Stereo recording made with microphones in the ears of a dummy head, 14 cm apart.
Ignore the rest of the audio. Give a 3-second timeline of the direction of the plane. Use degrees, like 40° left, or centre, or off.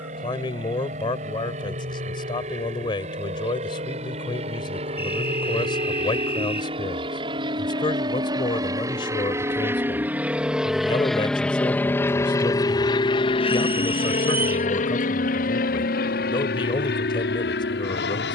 50° right, 40° right, 30° right, 10° right, 30° left, 60° left.